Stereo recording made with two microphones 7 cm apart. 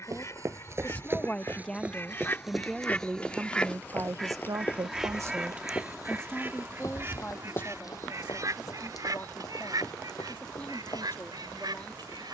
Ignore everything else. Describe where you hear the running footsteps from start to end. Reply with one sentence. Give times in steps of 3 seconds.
In this clip you hear the running footsteps on the right from 0 s and on the left from 3 s.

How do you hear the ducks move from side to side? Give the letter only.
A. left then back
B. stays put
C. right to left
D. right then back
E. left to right
E.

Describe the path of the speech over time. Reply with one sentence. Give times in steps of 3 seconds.
In this clip you hear the speech in the centre from 0 s, on the right from 3 s and on the left from 6 s.